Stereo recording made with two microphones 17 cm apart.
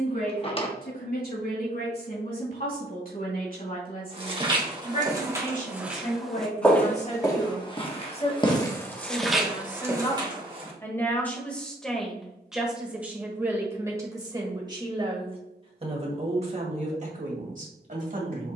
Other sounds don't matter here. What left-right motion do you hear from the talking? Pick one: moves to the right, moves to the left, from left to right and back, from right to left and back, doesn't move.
moves to the right.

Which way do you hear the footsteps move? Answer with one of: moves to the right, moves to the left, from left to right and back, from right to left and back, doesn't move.
from right to left and back.